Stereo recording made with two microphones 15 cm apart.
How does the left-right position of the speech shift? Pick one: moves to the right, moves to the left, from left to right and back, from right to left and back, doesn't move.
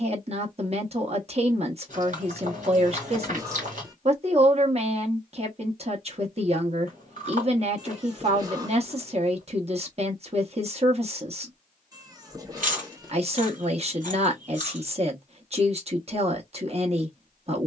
doesn't move.